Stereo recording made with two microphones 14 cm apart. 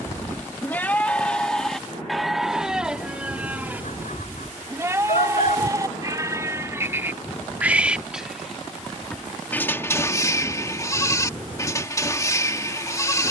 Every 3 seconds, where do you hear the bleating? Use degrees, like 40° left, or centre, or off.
10° left, 20° right, 10° right, 20° left, 20° left.